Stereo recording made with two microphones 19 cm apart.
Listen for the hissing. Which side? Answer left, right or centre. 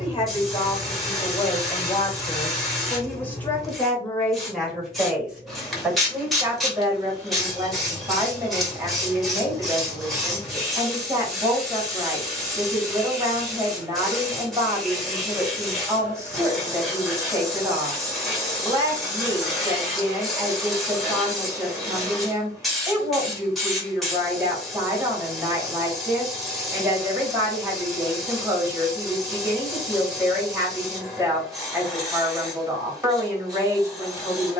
centre.